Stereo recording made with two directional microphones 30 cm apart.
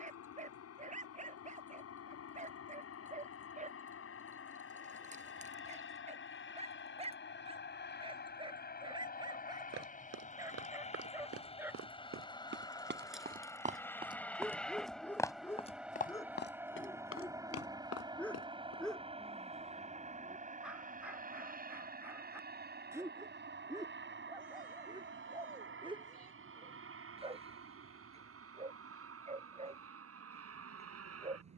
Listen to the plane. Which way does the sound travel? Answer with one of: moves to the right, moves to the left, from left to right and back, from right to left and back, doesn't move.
moves to the right.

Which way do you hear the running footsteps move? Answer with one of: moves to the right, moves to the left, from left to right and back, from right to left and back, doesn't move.
moves to the left.